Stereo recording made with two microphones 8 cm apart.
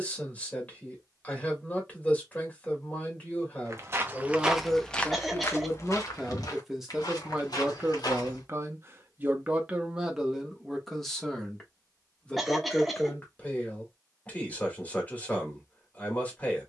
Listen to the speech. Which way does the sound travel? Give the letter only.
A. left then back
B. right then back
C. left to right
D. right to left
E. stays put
B.